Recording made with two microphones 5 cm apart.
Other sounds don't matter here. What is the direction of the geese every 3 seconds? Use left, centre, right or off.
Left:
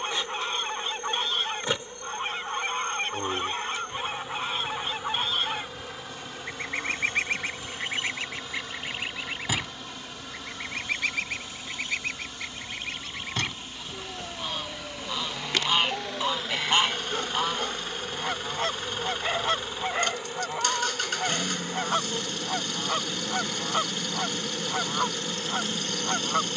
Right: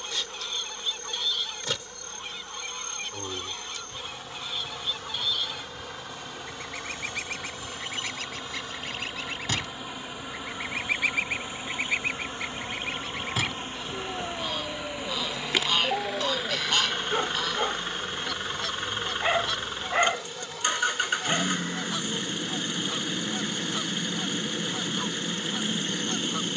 left, left, left, centre, centre, left, left, left, left.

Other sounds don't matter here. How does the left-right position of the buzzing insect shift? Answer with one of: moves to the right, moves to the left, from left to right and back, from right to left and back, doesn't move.
from left to right and back.